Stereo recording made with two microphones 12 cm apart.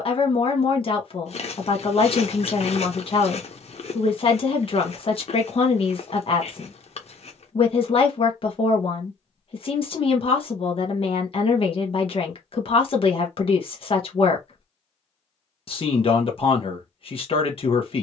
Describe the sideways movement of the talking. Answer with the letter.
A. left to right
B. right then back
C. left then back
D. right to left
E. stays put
E.